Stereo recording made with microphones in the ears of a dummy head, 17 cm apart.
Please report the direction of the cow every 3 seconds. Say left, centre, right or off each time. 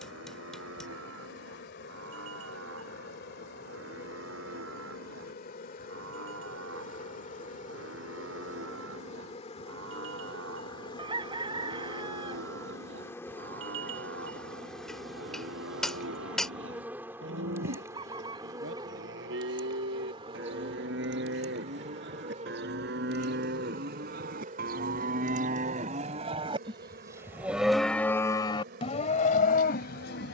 right, right, right, right, right, right, right, right, right, left.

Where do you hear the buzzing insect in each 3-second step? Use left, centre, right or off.
left, left, left, left, centre, centre, right, right, right, right.